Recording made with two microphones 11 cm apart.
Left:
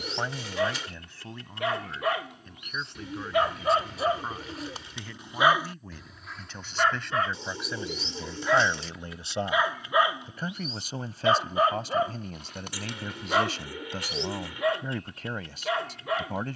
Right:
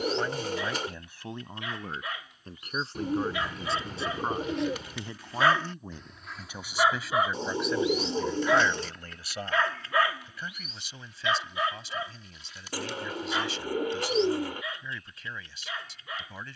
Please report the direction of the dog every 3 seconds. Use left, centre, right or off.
left, left, centre, left, left, left.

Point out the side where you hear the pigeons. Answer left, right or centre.
right.